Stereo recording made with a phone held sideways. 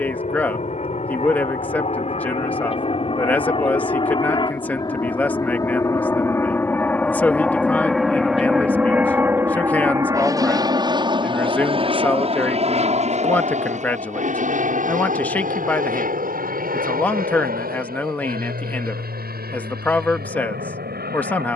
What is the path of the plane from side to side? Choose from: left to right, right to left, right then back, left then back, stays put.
left to right.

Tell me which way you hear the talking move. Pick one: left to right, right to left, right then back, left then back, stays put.
stays put.